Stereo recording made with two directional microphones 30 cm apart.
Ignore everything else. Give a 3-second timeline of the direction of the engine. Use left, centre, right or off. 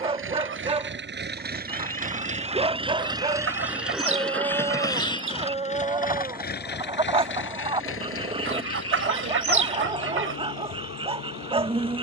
right, centre, left, left.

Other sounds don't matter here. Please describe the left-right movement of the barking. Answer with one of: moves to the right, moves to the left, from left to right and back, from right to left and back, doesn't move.
doesn't move.